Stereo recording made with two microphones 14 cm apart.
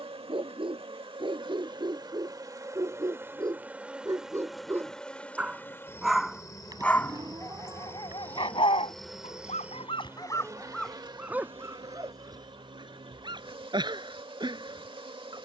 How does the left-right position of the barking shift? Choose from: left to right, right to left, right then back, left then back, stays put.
left then back.